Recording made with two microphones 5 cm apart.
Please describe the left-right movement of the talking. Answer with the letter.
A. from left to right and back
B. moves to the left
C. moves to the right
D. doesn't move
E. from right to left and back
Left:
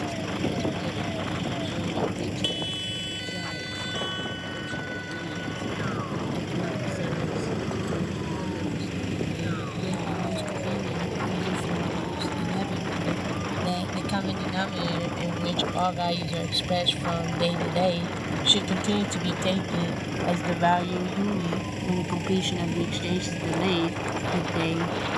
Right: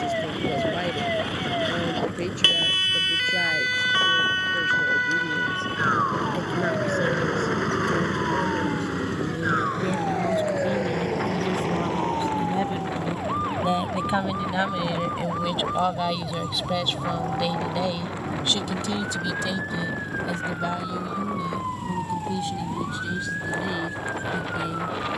B.